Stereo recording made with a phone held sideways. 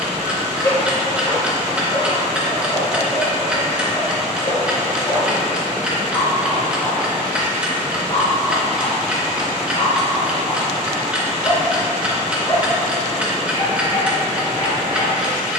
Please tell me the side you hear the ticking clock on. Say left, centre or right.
centre.